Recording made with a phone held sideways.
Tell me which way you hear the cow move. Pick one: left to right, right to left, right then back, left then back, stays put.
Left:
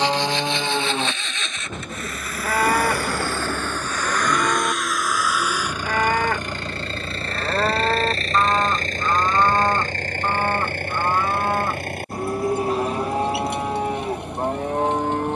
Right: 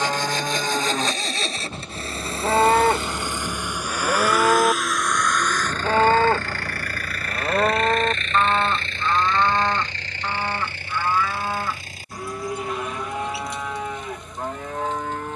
right then back.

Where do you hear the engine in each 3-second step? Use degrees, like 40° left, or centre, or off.
30° right, centre, 30° left, 50° left, 60° left.